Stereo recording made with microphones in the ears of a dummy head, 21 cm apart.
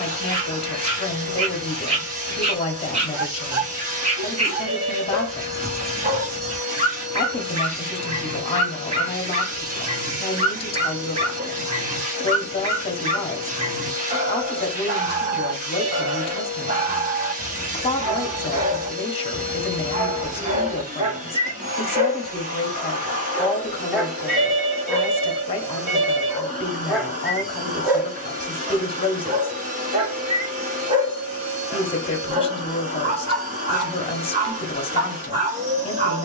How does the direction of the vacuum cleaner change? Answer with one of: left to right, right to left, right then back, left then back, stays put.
stays put.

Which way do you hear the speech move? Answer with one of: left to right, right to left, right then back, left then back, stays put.
stays put.